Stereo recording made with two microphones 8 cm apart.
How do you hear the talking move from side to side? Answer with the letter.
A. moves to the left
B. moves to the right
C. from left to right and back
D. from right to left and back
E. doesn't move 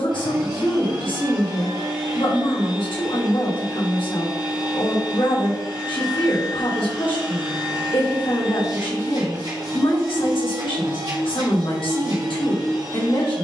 E.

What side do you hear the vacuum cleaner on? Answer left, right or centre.
right.